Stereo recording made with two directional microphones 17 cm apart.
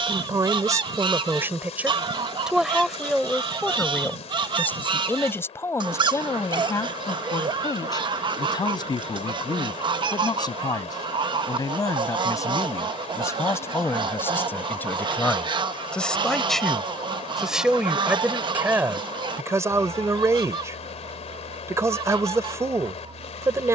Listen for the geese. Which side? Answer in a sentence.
You can hear the geese on the right.